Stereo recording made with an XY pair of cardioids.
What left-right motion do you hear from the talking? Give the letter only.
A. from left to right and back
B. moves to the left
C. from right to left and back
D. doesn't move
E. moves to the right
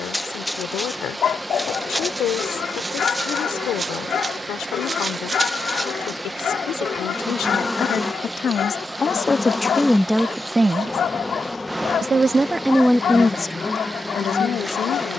A.